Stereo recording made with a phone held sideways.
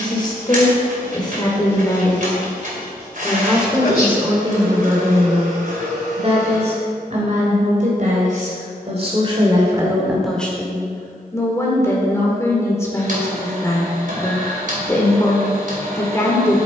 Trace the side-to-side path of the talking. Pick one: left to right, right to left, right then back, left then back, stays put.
right then back.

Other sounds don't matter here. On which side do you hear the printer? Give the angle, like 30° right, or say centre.
60° right.